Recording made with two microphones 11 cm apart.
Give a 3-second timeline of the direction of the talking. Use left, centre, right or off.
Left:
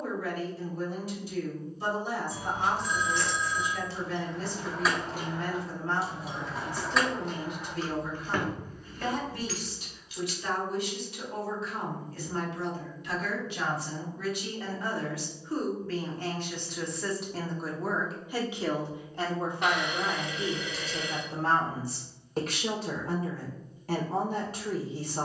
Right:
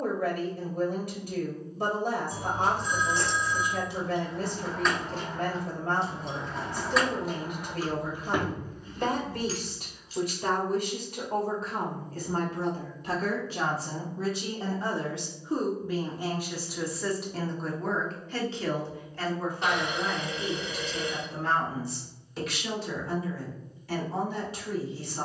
right, right, right, right, right, centre, left, left, left.